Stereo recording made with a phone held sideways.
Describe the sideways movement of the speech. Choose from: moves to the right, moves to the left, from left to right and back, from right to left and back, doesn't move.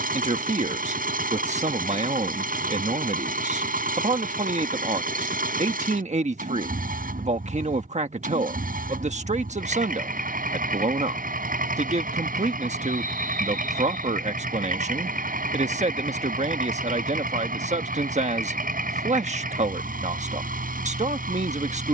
doesn't move.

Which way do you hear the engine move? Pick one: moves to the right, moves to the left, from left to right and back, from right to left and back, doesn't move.
doesn't move.